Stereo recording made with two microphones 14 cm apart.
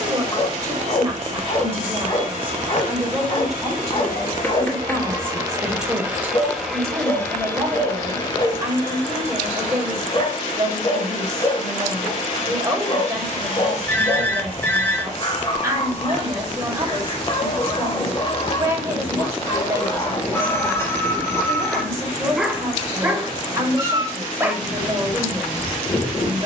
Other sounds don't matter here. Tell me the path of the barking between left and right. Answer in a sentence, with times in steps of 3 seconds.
In this clip you hear the barking on the left from 0 s and in the centre from 21 s.